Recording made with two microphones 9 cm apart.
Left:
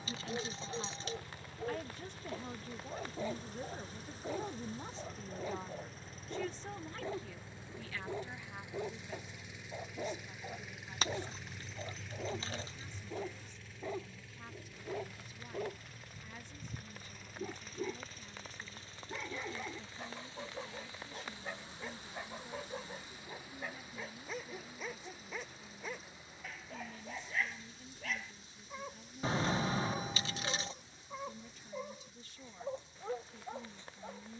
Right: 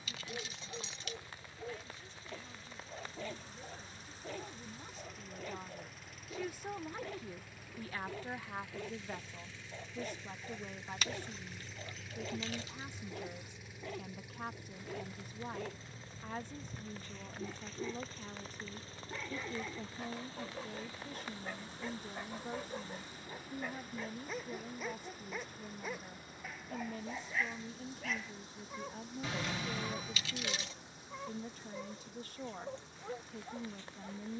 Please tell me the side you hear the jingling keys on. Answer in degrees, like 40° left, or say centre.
30° left.